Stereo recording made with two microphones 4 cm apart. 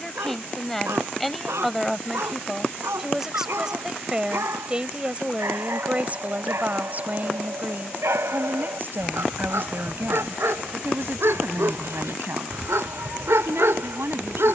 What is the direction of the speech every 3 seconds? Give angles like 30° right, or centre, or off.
centre, 20° right, 40° right, 60° right, 70° right.